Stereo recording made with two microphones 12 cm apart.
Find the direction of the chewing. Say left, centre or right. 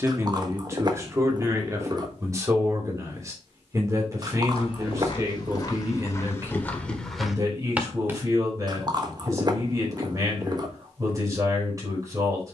right.